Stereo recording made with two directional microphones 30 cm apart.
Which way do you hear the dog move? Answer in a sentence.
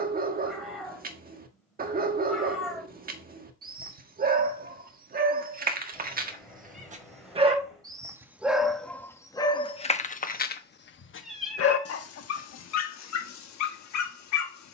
In this clip you hear the dog travel towards the left.